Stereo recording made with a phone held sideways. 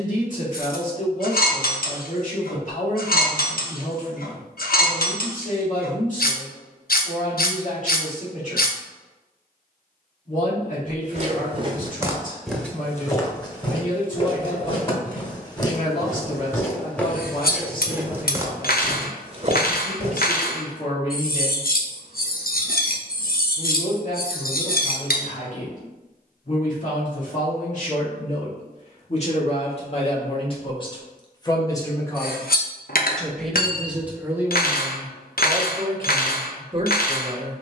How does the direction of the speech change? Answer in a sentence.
You can hear the speech move from left to right.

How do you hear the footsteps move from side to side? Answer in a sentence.
You can hear the footsteps go left and come back.